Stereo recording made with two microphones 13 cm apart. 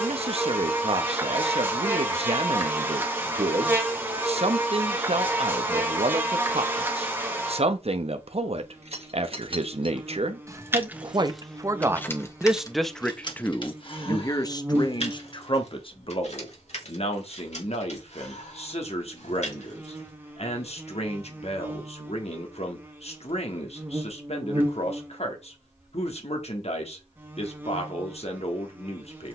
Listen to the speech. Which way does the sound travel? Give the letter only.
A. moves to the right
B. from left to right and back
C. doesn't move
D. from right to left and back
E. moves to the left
E.